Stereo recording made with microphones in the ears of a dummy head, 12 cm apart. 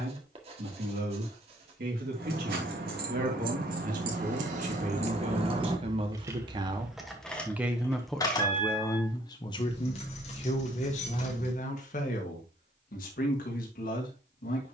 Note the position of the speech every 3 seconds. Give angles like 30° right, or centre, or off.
70° right, 50° right, 10° right, 50° left, 70° left.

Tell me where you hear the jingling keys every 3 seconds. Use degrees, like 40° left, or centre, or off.
70° right, 50° right, 10° left, 50° left, off.